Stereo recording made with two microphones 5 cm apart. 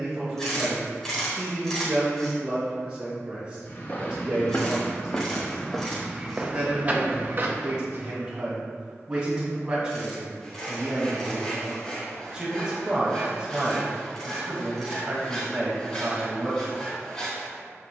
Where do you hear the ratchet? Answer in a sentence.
In this clip you hear the ratchet in the centre.